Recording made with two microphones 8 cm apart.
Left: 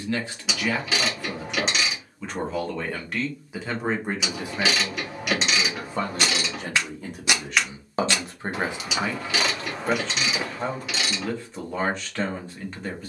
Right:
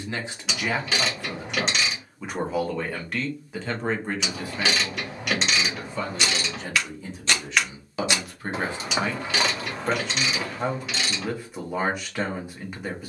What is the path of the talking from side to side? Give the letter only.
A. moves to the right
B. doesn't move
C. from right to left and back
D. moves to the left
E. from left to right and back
C.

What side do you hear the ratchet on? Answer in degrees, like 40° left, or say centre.
centre.